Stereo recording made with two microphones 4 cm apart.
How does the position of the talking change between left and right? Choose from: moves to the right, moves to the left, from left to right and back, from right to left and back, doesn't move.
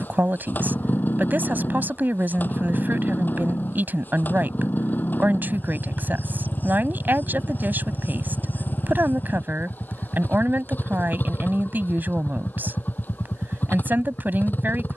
doesn't move.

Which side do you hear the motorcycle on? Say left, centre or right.
left.